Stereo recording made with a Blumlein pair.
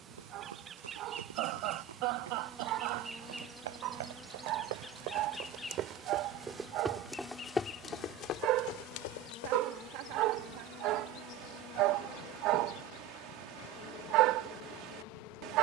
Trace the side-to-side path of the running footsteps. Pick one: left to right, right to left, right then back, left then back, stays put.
right to left.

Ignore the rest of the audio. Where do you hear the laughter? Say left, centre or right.
right.